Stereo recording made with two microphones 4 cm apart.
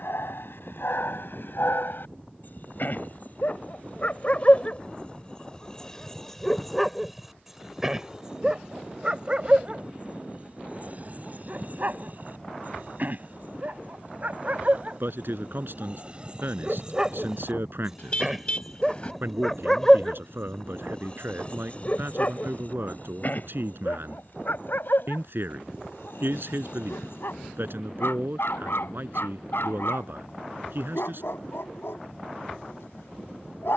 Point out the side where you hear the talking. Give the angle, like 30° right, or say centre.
60° right.